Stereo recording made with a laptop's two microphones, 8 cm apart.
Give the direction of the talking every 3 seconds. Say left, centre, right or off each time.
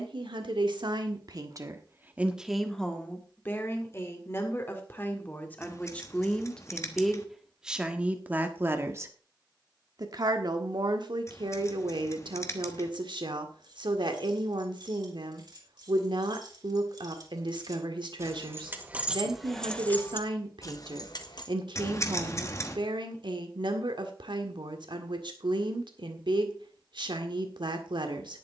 right, left, centre, right, right, right, right, right, right, right.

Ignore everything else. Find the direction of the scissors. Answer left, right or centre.
left.